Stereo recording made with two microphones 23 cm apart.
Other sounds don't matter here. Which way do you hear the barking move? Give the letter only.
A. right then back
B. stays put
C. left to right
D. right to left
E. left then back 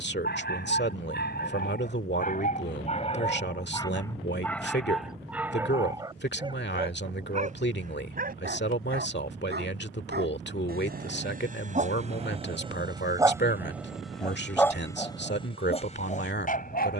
A.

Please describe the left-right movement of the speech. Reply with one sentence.
In this clip you hear the speech stay put.